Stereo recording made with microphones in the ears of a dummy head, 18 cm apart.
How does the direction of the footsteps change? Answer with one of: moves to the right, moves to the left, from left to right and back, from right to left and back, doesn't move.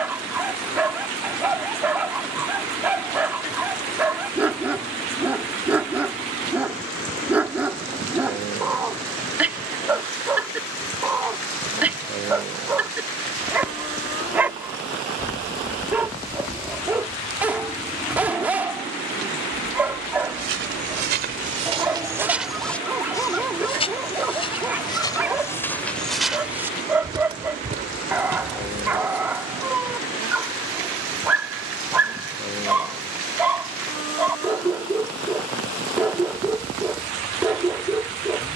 from right to left and back.